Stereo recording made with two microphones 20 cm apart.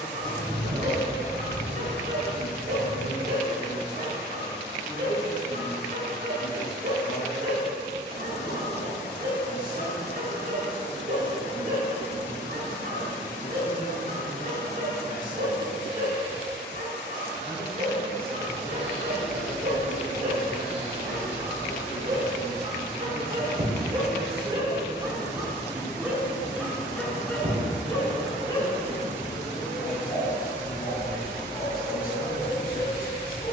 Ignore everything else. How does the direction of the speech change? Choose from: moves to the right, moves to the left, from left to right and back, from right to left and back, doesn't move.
doesn't move.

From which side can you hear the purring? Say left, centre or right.
right.